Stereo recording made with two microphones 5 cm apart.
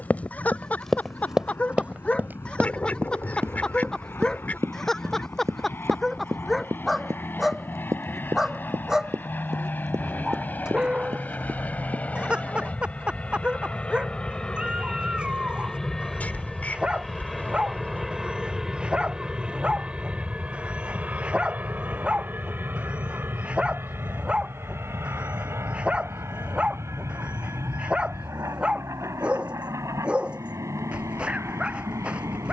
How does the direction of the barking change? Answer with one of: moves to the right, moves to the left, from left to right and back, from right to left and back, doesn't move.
moves to the right.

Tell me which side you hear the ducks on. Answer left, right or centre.
left.